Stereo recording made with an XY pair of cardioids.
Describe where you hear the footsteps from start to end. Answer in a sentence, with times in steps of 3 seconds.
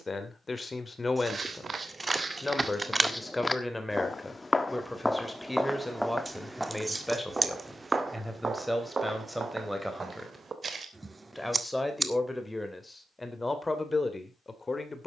You can hear the footsteps on the right from 0 s, in the centre from 3 s, on the right from 6 s and not at all from 12 s.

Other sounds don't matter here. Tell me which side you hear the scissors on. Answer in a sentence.
In this clip you hear the scissors on the right.